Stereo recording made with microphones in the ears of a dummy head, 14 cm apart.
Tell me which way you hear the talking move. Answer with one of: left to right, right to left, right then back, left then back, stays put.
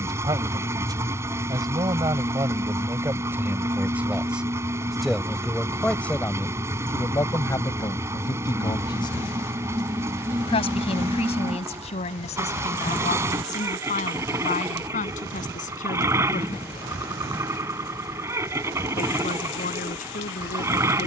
right to left.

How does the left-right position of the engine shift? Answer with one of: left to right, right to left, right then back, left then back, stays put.
stays put.